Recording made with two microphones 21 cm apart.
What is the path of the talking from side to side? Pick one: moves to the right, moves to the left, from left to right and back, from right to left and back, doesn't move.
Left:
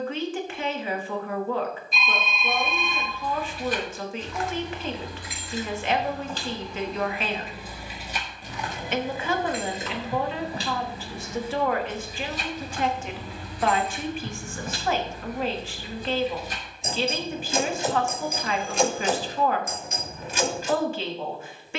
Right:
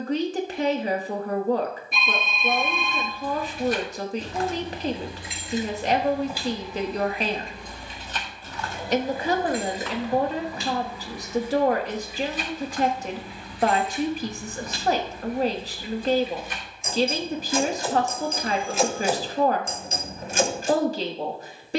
doesn't move.